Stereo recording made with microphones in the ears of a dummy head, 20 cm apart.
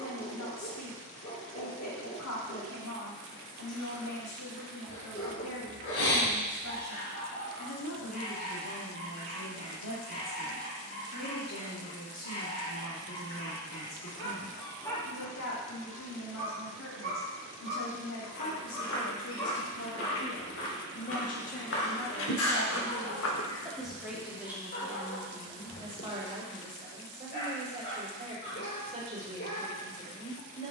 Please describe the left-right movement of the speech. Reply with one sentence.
In this clip you hear the speech move from left to right.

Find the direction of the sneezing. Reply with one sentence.
In this clip you hear the sneezing on the left.